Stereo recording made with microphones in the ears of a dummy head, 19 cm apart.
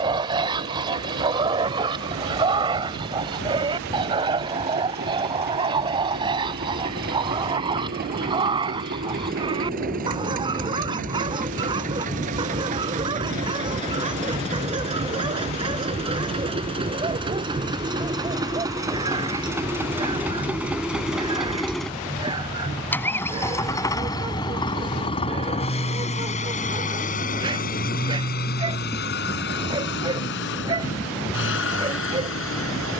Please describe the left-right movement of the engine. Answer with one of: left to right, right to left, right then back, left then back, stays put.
right to left.